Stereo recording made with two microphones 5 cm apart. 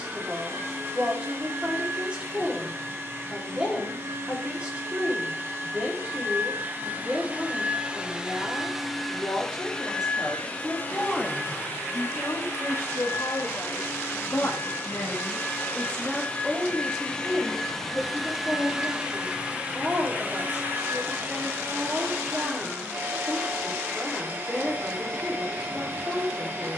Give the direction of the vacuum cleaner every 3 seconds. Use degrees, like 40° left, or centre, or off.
50° right, 50° right, 30° right, 30° left, 50° left, 30° left, 20° right, 50° right, 50° right.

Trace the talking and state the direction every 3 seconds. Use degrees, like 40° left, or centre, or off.
20° right, 20° right, 20° right, 10° right, 50° left, 10° left, 20° right, 20° right, 20° right.